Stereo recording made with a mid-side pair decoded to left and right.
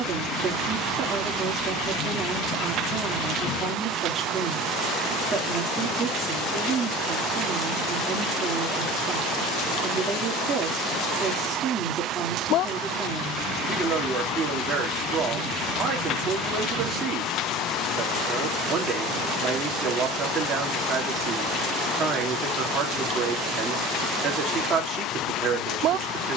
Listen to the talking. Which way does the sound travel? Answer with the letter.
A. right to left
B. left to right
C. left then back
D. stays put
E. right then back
D.